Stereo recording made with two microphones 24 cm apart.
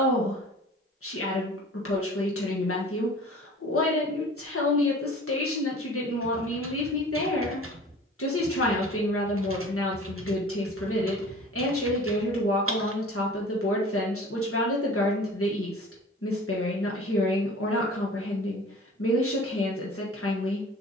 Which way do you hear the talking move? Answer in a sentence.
You can hear the talking stay put.